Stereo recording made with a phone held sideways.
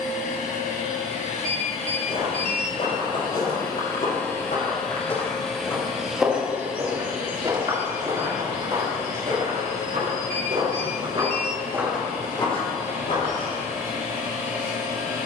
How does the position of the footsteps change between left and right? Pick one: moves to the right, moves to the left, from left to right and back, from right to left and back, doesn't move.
from left to right and back.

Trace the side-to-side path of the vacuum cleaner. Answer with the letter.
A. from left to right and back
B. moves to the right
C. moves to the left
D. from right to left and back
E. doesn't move
B.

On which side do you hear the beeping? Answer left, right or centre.
right.